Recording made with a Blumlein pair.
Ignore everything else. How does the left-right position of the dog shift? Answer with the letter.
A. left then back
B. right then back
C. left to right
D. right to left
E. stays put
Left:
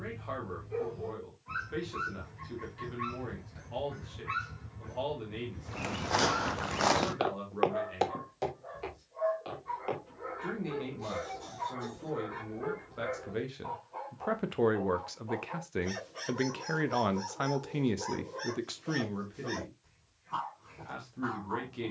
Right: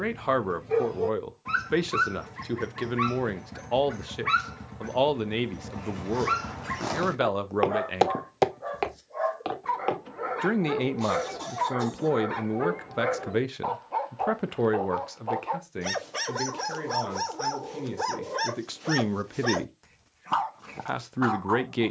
E.